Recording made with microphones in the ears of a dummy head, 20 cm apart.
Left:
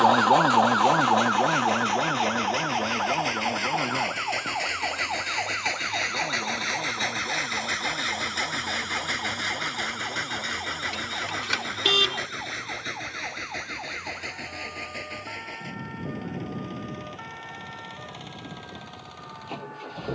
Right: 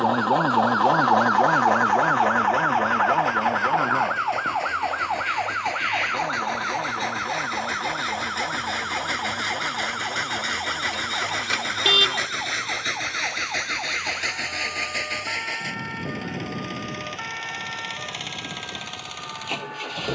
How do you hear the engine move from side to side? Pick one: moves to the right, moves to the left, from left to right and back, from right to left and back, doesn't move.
moves to the right.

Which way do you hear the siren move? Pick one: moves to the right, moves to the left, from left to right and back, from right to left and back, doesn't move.
moves to the right.